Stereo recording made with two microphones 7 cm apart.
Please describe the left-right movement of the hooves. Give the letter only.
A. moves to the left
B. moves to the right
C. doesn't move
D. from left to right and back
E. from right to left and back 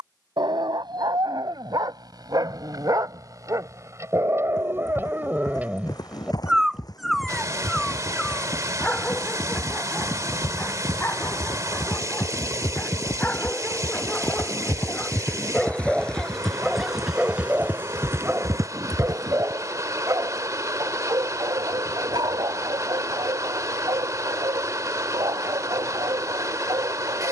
B.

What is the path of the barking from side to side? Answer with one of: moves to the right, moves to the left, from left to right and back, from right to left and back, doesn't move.
from right to left and back.